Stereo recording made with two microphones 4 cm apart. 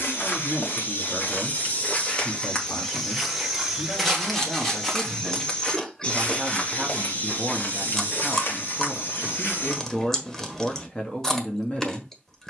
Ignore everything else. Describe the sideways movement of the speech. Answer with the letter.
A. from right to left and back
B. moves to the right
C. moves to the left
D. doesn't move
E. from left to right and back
E.